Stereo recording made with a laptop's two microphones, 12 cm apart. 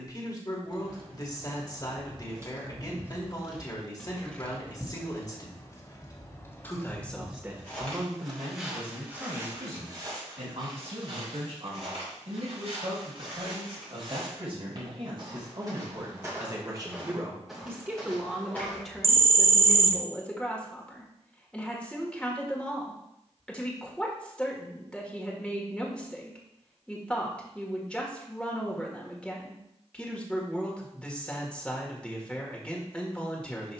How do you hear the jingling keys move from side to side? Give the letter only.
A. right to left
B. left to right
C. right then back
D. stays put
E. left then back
E.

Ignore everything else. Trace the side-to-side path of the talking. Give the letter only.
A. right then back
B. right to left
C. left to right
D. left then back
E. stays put
A.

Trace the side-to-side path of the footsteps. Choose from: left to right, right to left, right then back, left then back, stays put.
right then back.